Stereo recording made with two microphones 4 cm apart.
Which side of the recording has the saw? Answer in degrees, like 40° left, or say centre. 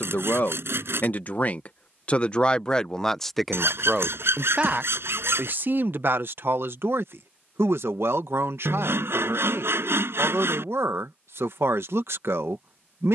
70° right.